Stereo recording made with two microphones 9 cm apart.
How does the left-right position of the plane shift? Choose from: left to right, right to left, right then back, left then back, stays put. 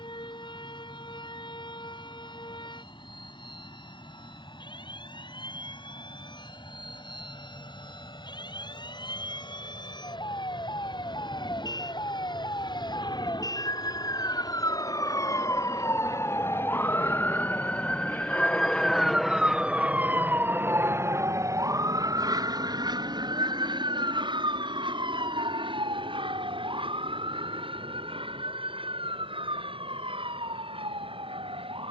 left to right.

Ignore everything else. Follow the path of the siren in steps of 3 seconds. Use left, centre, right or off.
left, left, left, left, left, left, centre, right, right, right, right.